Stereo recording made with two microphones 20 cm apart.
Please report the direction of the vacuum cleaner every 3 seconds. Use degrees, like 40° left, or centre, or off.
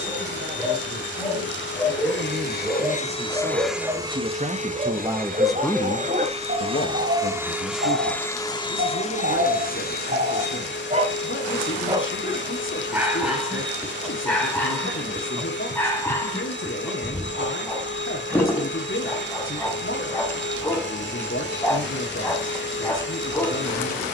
60° left, 20° right, 10° right, 60° left, 60° left, 60° left, 60° left, 60° left.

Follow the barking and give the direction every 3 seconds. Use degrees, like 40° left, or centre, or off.
centre, 30° right, 60° right, 50° right, centre, 10° left, 10° left, 10° left.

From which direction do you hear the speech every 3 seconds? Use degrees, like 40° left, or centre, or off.
60° right, 30° right, 70° left, 80° left, 80° left, 80° left, 80° left, 80° left.